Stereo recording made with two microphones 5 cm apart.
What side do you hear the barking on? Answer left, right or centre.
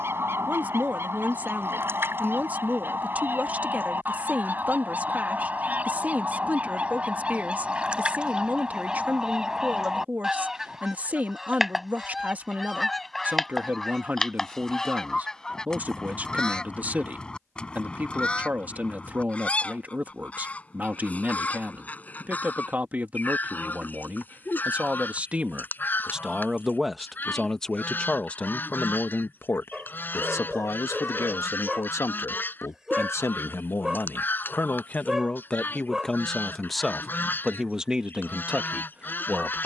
centre.